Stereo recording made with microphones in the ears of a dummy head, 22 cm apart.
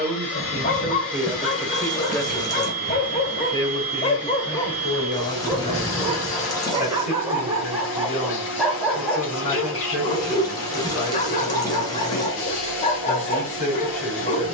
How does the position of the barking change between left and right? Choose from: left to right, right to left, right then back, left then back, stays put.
right then back.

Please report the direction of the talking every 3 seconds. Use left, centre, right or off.
centre, left, left, left, left.